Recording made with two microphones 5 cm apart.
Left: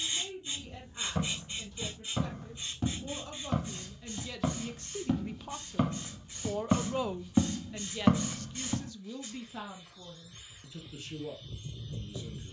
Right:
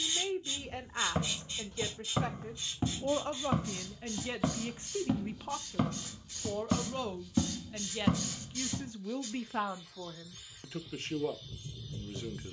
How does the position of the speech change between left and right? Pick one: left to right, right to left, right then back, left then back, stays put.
left then back.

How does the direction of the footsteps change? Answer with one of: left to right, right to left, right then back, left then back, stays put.
right to left.